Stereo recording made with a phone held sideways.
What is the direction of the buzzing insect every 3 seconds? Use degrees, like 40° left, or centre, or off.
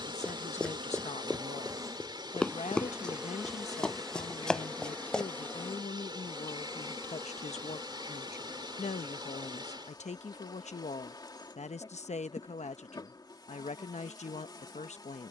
30° right, 10° left, 20° left, 30° left, 30° left.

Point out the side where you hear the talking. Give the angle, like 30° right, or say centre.
60° left.